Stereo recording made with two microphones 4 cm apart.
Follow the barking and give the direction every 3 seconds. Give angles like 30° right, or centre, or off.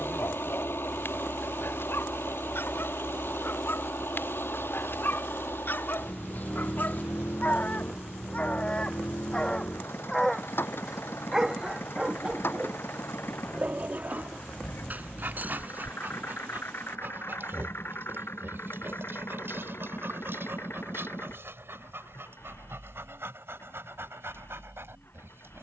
70° left, 60° left, 50° left, centre, 40° right, 60° right, 70° right, 70° right, 80° right.